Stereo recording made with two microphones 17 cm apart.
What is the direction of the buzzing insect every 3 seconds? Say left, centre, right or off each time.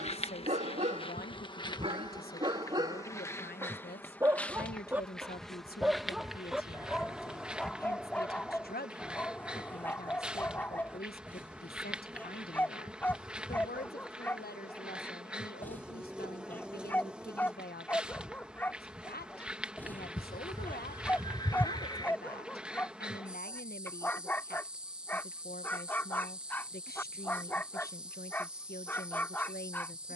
left, centre, centre, centre, centre, centre, centre, centre, centre, centre.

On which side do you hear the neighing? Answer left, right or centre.
left.